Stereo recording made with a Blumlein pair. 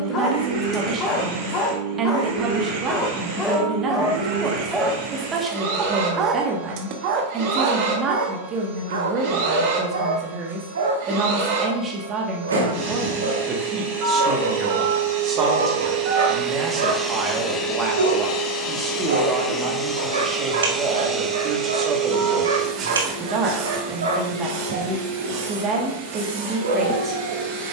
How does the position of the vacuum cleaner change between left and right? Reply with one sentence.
In this clip you hear the vacuum cleaner go left and come back.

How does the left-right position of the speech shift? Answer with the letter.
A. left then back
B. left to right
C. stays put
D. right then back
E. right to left
C.